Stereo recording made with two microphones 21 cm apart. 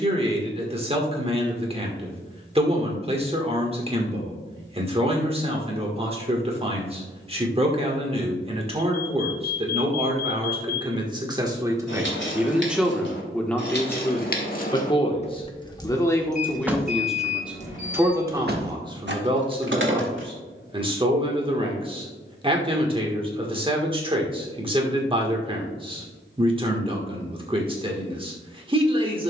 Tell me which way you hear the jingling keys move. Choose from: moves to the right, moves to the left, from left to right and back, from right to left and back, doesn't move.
moves to the right.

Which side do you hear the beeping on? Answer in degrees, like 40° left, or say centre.
40° left.